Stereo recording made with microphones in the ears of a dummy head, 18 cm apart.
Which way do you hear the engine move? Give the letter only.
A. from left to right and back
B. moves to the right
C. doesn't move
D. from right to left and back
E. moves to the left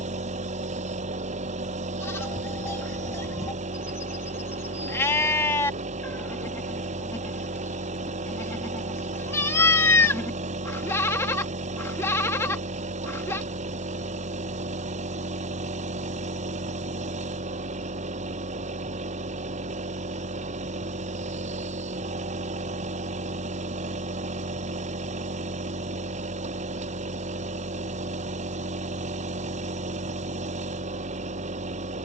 C.